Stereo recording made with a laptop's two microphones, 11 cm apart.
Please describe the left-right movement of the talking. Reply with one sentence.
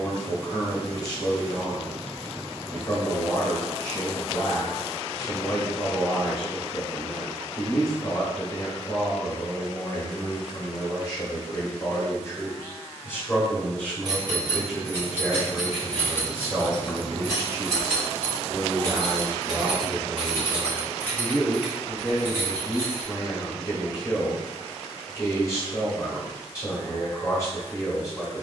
In this clip you hear the talking move from left to right and back again.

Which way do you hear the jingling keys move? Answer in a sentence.
You can hear the jingling keys move from right to left and back again.